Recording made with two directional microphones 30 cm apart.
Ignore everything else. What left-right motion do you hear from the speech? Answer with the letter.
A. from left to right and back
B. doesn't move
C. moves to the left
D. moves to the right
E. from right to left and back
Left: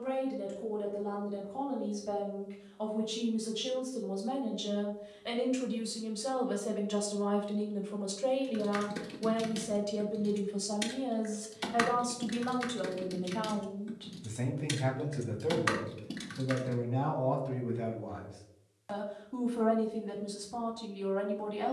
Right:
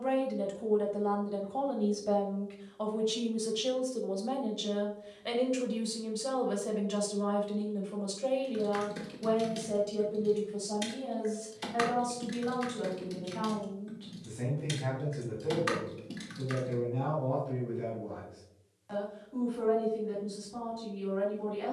C.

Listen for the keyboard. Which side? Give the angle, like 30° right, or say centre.
20° left.